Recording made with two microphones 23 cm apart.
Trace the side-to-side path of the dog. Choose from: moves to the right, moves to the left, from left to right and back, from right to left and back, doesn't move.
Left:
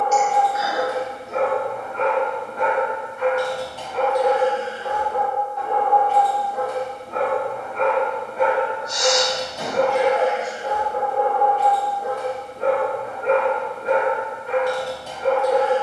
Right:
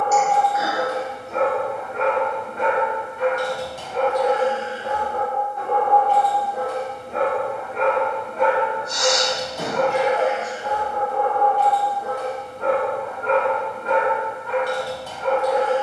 from left to right and back.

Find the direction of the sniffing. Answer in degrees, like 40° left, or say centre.
50° right.